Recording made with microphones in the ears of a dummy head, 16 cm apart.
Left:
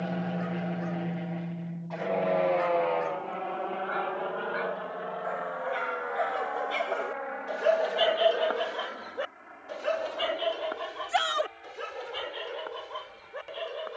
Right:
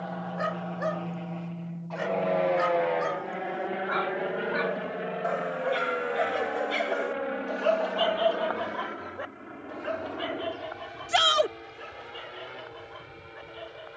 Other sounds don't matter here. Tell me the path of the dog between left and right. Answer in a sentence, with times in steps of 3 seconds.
You can hear the dog on the right from 0 s, in the centre from 6 s and on the left from 9 s.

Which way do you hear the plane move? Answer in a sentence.
You can hear the plane move from left to right.